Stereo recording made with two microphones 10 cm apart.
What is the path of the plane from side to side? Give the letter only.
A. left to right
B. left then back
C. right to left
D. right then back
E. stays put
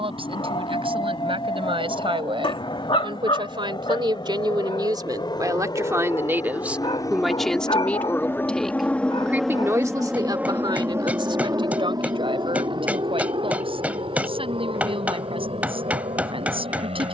A.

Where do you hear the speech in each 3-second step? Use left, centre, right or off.
right, right, centre, right, right, right.